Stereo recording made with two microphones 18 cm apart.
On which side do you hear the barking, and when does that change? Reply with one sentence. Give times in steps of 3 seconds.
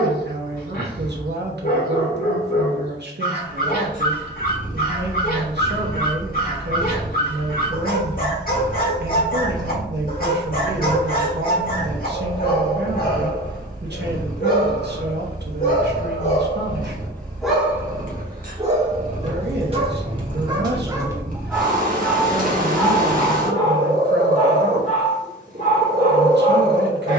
In this clip you hear the barking on the left from 0 s, on the right from 18 s, in the centre from 21 s and on the left from 24 s.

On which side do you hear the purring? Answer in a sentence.
You can hear the purring on the right.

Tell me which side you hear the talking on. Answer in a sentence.
In this clip you hear the talking on the right.